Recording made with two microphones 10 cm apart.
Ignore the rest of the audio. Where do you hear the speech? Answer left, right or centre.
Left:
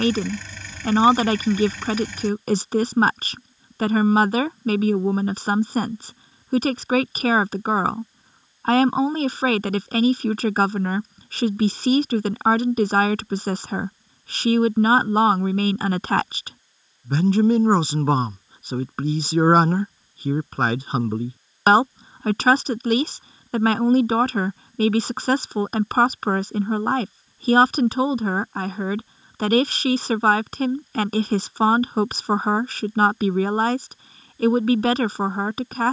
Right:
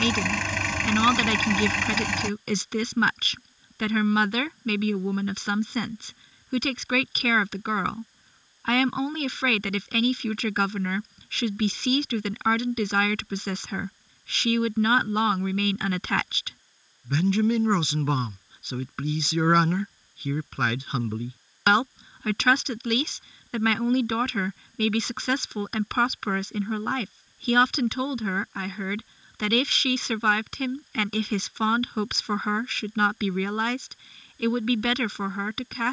left.